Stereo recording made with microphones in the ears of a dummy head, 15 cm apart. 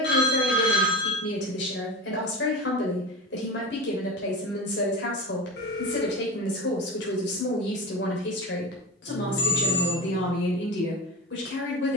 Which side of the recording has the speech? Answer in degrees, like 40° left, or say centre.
70° left.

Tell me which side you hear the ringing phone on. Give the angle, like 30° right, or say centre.
60° left.